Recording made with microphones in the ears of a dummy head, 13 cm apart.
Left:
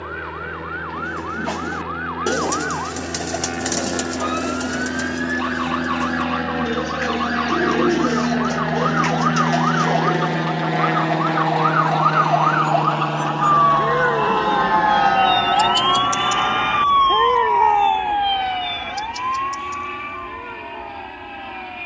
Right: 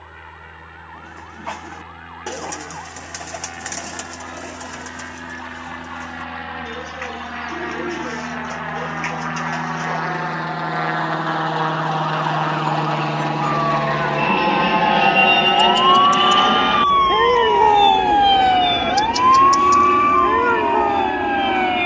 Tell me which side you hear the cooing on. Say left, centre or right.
left.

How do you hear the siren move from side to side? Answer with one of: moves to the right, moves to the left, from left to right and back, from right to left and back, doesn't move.
moves to the right.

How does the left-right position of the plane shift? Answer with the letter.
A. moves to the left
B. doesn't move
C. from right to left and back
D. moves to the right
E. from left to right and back
D.